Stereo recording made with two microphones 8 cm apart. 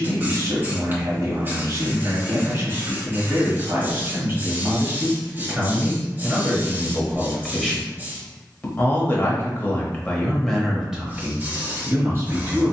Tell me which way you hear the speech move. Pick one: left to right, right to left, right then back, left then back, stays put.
left then back.